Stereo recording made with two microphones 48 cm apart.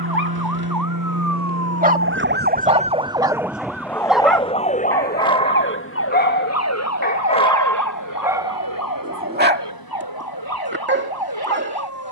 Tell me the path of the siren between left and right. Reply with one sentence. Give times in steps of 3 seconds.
You can hear the siren on the right from 0 s, in the centre from 3 s and on the left from 6 s.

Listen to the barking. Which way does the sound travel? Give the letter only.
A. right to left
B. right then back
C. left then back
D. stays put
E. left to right
C.